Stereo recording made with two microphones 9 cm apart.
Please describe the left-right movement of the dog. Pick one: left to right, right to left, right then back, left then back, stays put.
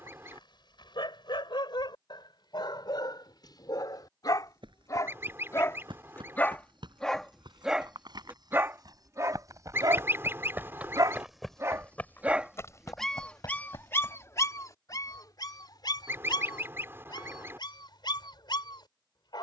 right then back.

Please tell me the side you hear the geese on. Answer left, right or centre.
right.